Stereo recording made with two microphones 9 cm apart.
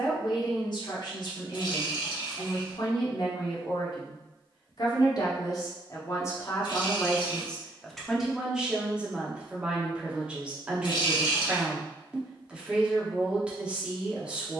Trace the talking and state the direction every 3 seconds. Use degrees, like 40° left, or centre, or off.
60° left, 50° left, 10° left, 10° right, 10° right.